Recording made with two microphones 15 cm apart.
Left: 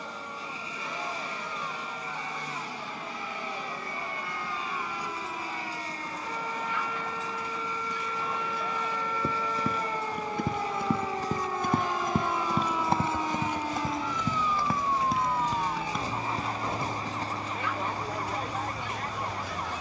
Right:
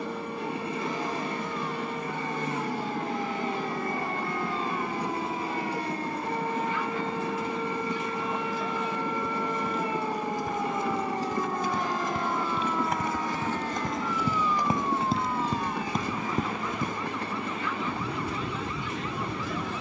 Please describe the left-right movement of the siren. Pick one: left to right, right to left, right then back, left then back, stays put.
right to left.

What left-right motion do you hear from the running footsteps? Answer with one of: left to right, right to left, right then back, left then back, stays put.
left to right.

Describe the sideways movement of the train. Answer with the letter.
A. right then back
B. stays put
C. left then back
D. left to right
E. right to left
B.